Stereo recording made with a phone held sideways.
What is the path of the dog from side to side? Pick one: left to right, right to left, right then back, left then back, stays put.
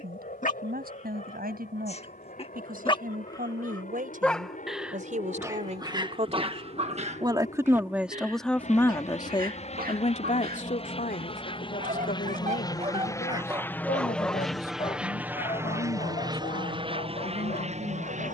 right then back.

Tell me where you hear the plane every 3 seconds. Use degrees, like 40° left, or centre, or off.
70° left, 60° left, 60° left, 40° left, 10° left, 30° right.